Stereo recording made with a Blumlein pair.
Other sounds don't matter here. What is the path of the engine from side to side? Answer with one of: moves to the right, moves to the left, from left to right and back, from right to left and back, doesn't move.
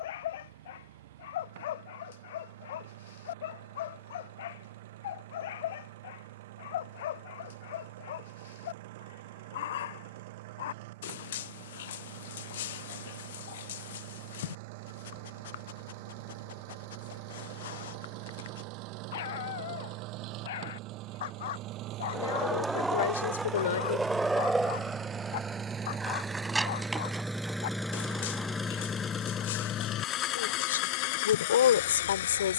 moves to the left.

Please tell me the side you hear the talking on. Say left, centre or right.
left.